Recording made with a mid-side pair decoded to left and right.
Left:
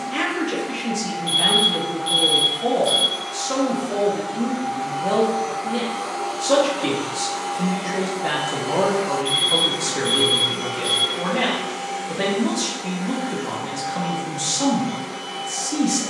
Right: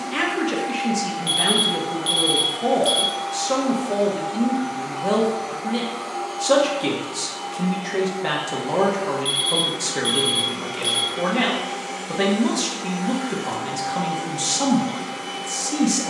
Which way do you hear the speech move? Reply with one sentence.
In this clip you hear the speech stay in one place.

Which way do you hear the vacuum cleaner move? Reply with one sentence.
In this clip you hear the vacuum cleaner move from right to left and back again.